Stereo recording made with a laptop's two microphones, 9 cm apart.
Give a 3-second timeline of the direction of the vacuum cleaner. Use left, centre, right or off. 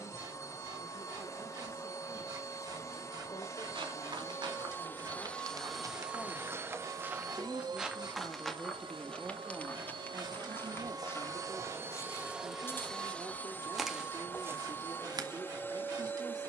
left, left, right, right, centre, left.